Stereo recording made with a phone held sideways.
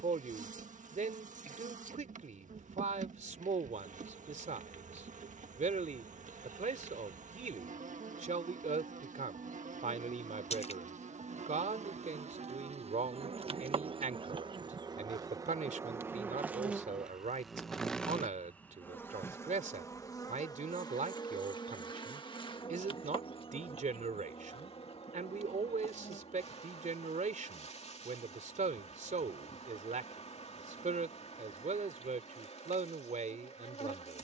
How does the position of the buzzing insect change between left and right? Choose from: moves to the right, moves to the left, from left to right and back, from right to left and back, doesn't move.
moves to the left.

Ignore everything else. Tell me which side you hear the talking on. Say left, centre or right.
right.